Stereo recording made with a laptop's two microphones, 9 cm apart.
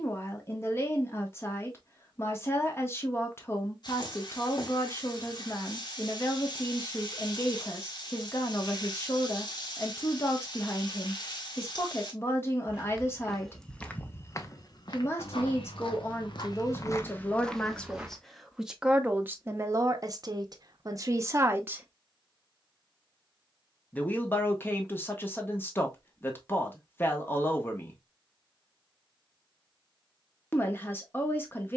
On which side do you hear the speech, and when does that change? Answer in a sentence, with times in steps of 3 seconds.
In this clip you hear the speech on the left from 0 s, on the right from 18 s and on the left from 24 s.